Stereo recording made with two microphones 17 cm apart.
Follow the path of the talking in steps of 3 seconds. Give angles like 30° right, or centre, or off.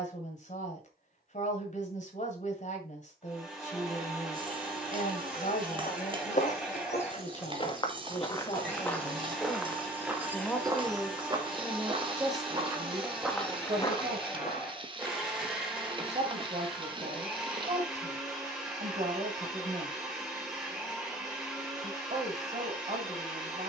50° left, 50° left, 40° left, centre, 30° right, 40° right, 40° right, 40° right.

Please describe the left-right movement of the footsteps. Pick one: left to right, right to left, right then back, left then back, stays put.
right then back.